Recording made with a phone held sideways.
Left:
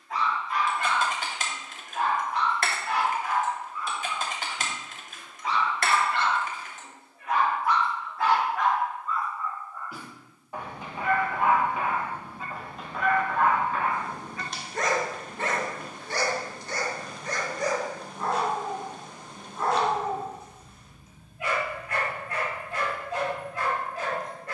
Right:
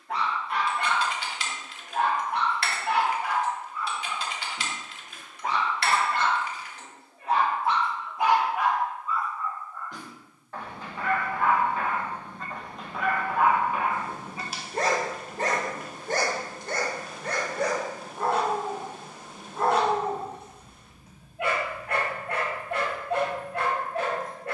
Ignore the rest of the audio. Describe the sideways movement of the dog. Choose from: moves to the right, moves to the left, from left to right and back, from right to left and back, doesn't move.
from right to left and back.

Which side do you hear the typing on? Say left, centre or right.
left.